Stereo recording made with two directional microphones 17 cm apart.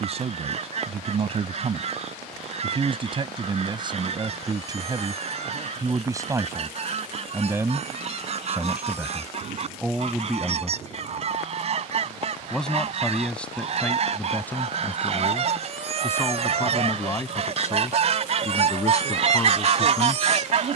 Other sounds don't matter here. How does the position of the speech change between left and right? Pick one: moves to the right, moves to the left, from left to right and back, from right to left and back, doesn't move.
moves to the left.